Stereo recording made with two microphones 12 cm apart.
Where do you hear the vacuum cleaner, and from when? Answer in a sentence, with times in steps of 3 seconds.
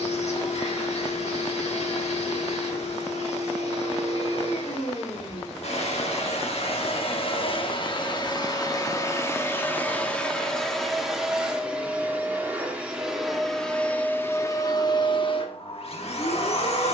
In this clip you hear the vacuum cleaner on the left from 0 s, in the centre from 9 s and on the left from 15 s.